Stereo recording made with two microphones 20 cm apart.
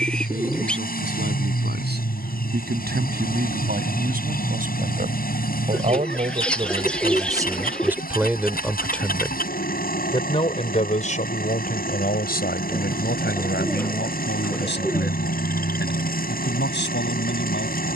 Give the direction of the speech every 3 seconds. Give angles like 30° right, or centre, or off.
60° right, 50° right, 20° right, 30° left, 60° left, 60° left.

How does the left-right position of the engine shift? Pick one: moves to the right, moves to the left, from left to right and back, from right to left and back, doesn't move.
doesn't move.